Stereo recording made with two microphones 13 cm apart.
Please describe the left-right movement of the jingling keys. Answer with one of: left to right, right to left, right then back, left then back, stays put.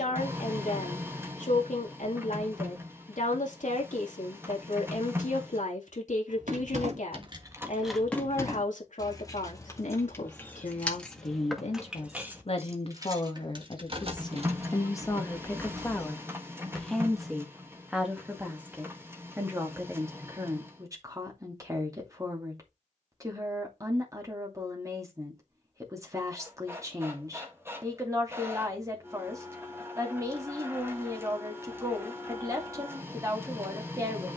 left then back.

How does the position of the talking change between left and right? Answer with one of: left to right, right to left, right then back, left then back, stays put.
left to right.